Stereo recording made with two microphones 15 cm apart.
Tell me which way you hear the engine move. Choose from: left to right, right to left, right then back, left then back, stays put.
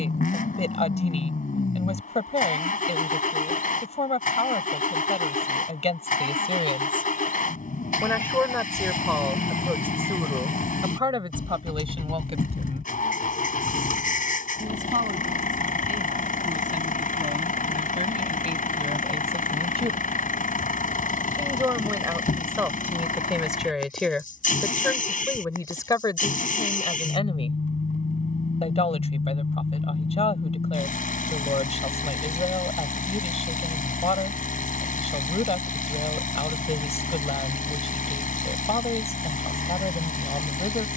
stays put.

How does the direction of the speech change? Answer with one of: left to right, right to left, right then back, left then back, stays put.
right then back.